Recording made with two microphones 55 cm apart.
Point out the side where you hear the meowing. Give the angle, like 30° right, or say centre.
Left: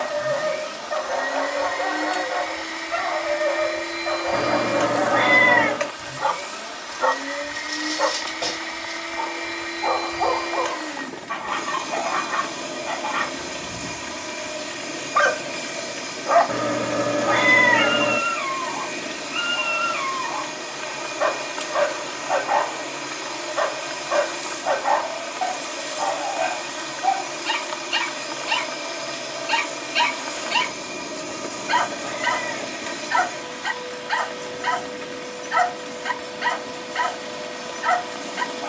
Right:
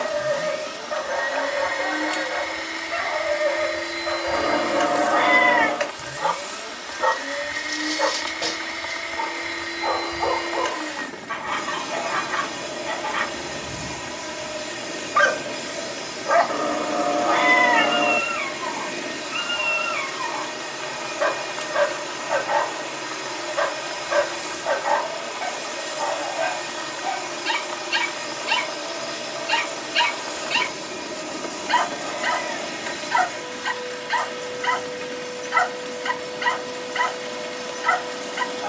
50° left.